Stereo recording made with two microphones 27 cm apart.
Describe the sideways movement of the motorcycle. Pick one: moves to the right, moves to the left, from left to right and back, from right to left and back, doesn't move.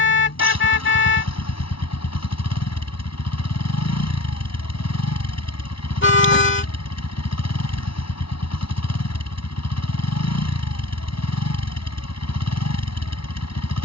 doesn't move.